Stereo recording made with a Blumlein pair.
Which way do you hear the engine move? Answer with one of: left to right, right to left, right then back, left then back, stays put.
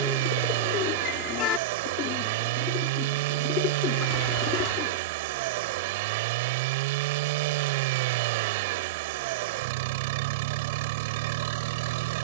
stays put.